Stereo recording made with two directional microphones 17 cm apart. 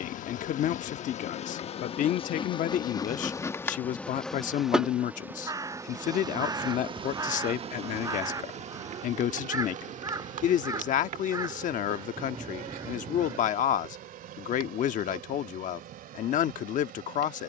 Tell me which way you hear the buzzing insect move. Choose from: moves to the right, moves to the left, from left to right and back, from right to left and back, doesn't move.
moves to the right.